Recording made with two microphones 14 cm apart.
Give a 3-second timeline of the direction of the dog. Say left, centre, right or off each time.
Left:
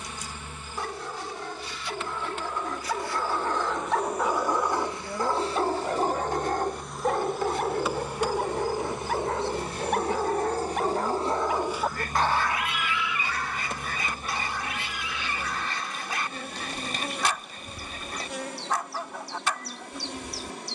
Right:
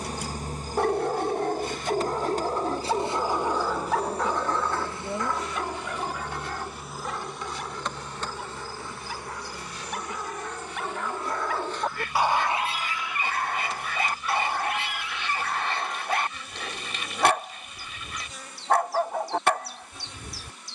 right, centre, left, left, right, right, right.